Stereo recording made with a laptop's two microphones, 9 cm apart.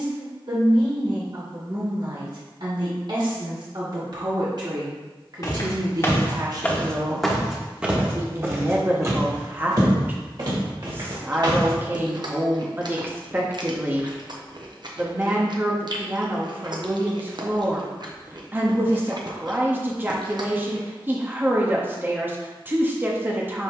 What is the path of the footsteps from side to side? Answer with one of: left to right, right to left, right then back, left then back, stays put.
left to right.